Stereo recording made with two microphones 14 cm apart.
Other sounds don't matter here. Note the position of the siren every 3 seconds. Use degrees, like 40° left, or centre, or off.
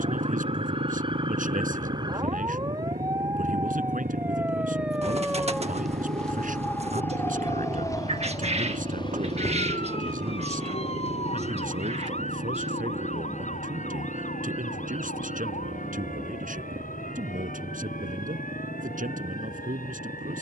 40° right, 10° right, 20° left, 40° left, 60° left, 70° left, 70° left.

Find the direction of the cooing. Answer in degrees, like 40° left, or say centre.
50° right.